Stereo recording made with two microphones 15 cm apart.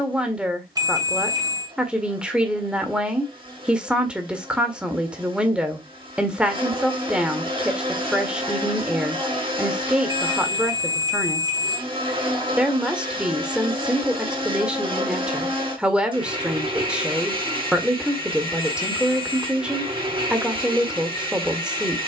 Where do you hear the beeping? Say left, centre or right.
right.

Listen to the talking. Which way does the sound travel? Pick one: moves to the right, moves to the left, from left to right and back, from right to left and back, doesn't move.
doesn't move.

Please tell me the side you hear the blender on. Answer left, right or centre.
right.